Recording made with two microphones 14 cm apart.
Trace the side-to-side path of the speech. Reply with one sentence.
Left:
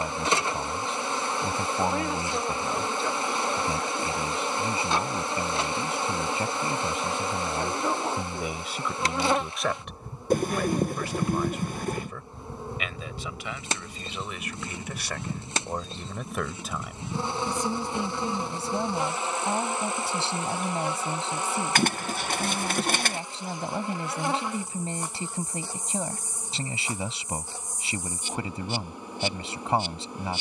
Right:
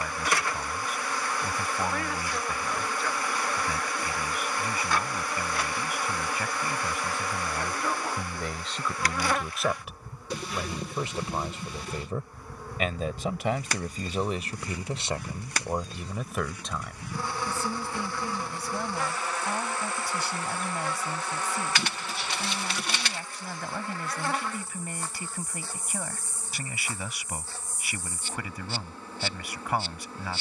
You can hear the speech go right and come back.